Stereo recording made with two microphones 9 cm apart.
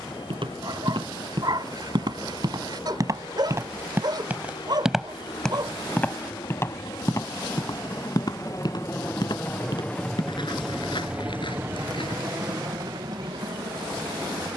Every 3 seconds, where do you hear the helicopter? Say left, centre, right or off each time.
left, left, left, centre, right.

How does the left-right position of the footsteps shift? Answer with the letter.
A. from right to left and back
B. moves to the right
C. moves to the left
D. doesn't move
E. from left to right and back
C.